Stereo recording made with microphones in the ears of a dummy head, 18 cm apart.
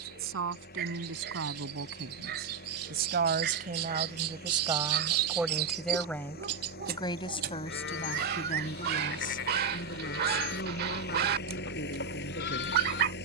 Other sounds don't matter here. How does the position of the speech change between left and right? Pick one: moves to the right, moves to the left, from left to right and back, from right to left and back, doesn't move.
moves to the left.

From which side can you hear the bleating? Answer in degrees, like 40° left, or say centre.
60° left.